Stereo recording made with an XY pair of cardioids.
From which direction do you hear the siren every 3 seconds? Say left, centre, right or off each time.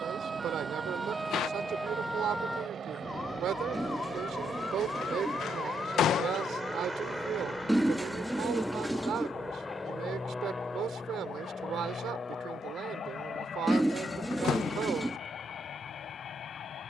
centre, left, left, left, left, left.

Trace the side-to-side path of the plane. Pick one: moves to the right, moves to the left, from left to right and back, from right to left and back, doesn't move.
moves to the left.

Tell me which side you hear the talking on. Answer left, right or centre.
right.